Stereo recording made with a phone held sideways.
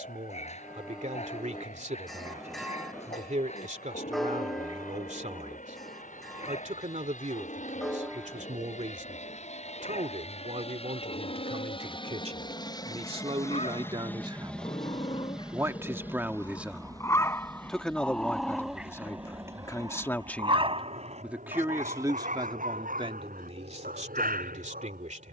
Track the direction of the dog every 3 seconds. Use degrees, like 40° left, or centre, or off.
50° left, 50° left, 50° left, 50° left, 40° left, 20° left, 20° right, 60° right, 70° right.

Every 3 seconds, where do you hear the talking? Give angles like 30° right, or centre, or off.
50° right, 50° right, 50° right, 50° right, 40° right, 10° right, 10° left, 30° right, 50° right.